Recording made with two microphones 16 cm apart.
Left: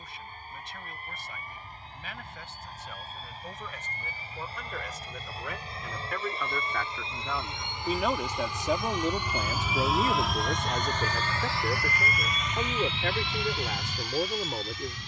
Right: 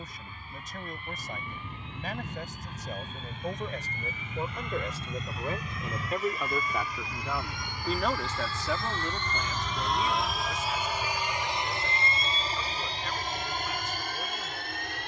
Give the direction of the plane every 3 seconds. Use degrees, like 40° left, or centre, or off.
50° left, 40° left, 30° left, centre, 50° right.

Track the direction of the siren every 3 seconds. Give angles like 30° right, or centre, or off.
70° right, 60° right, 30° right, 40° left, 70° left.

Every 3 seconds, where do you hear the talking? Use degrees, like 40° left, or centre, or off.
50° right, 40° right, centre, 60° left, 80° left.